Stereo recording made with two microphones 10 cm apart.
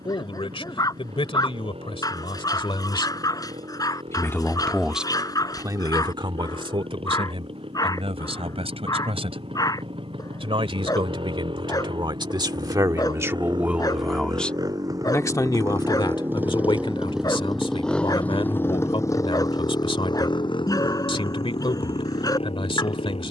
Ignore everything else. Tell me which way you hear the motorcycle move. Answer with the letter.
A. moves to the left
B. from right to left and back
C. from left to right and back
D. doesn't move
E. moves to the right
A.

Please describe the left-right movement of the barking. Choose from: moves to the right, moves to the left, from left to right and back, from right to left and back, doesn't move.
doesn't move.